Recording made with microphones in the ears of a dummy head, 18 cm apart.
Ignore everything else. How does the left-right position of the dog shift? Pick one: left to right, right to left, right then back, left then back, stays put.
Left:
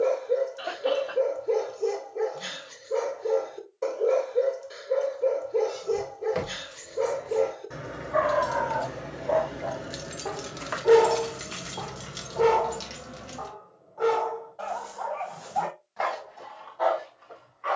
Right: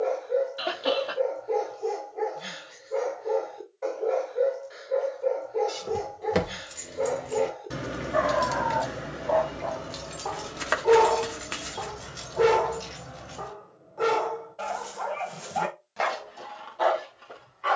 left to right.